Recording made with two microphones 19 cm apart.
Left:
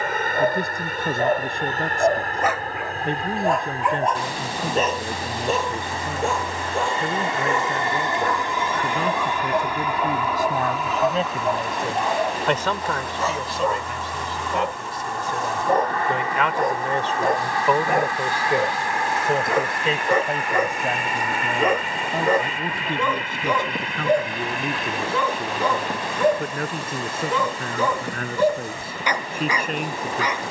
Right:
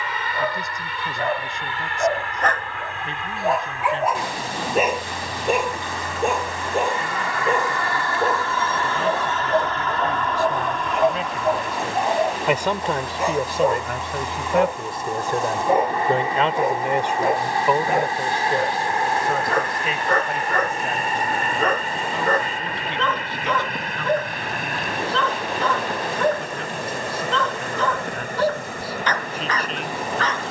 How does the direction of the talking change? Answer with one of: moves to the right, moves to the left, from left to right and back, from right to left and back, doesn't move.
from left to right and back.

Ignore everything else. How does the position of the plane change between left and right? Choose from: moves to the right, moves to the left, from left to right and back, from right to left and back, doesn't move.
moves to the right.